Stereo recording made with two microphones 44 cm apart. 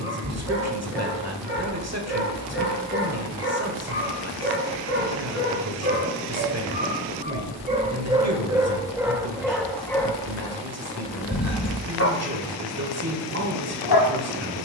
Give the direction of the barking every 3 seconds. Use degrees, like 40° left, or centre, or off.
30° right, 30° right, 20° right, 10° left, 50° left.